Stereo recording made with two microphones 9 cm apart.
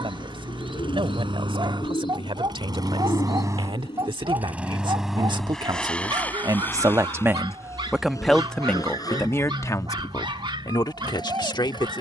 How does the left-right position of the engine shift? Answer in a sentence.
In this clip you hear the engine travel towards the left.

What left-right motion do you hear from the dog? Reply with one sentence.
In this clip you hear the dog stay put.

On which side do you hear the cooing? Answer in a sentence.
In this clip you hear the cooing on the left.